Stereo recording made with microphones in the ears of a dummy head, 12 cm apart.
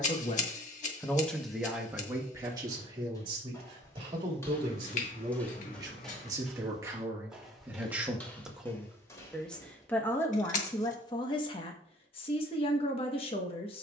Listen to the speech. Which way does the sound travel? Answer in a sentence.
You can hear the speech move from left to right and back again.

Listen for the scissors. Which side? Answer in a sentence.
You can hear the scissors on the left.